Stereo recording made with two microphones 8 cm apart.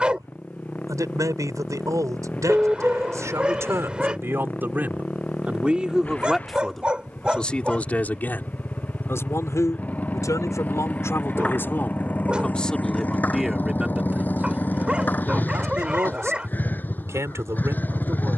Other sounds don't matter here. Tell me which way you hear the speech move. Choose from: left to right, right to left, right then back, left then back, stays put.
left then back.